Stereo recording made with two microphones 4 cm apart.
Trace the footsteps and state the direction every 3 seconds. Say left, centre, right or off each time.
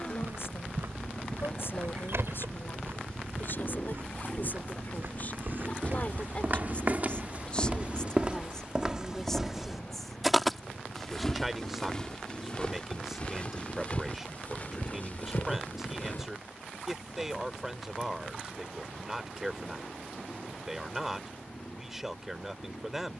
right, right, right, centre, left, left, off, off.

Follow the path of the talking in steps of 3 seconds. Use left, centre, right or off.
left, left, left, centre, centre, centre, centre, centre.